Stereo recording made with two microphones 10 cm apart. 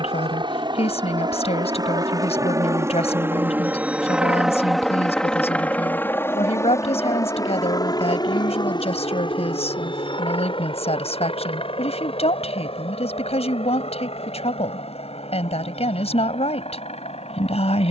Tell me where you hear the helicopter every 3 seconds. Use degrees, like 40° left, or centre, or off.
40° right, 10° right, 30° left, 50° left, 60° left, 70° left.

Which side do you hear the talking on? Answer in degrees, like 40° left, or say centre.
80° left.